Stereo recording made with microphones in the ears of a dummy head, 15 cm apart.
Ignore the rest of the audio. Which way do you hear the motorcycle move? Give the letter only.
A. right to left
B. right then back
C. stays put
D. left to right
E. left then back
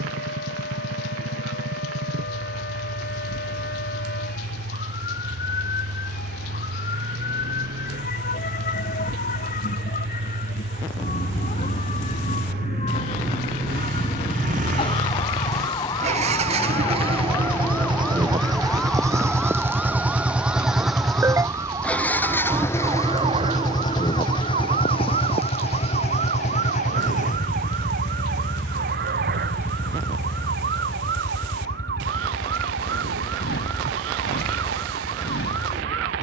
A.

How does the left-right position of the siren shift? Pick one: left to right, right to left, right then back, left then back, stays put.
left to right.